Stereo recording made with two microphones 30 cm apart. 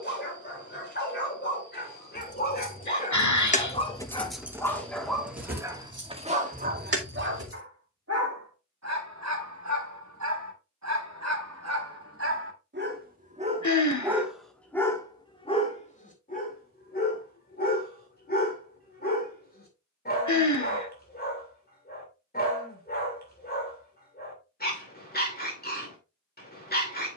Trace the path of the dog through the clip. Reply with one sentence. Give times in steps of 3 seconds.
In this clip you hear the dog on the left from 0 s, in the centre from 3 s, on the right from 6 s and on the left from 15 s.